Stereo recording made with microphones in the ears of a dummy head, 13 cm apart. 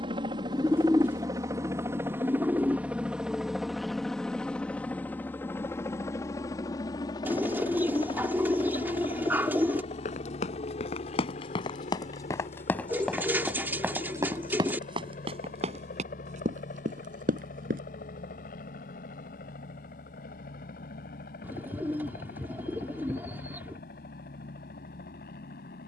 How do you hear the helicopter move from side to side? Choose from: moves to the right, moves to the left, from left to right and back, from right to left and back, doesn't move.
moves to the left.